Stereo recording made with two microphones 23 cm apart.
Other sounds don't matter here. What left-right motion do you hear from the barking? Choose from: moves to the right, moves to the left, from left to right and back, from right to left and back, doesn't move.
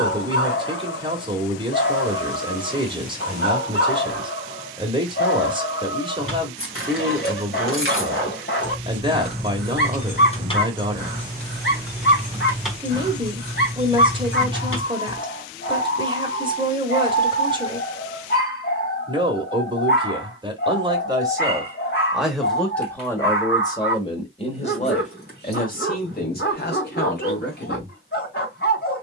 doesn't move.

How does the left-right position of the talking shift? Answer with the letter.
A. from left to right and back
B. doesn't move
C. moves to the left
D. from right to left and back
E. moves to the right
C.